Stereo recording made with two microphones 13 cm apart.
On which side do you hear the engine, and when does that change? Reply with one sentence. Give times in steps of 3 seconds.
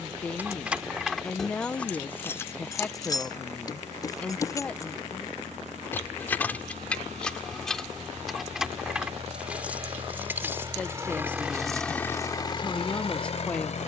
In this clip you hear the engine on the right from 0 s and on the left from 12 s.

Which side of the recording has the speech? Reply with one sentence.
You can hear the speech in the centre.